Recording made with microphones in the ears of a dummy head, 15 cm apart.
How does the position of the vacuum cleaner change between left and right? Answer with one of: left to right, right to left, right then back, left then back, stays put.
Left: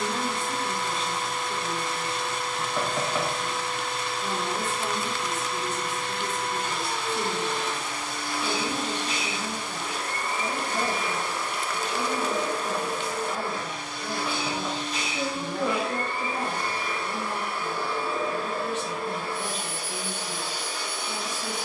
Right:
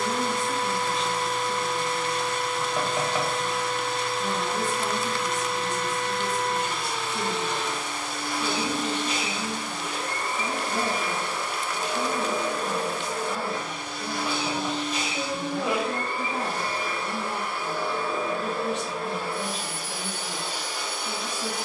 stays put.